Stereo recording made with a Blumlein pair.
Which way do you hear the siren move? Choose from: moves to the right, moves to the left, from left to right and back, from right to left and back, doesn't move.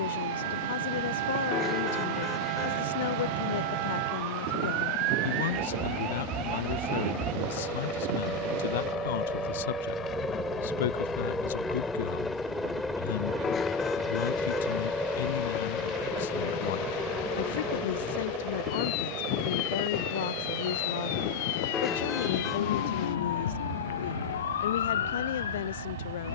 moves to the left.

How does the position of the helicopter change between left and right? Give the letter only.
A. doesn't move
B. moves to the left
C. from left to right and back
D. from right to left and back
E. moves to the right
E.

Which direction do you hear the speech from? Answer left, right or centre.
left.